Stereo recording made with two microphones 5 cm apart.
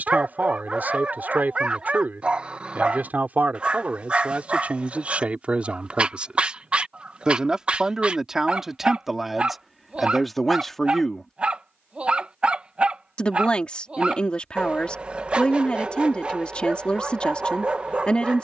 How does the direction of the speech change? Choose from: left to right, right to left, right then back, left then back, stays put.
right to left.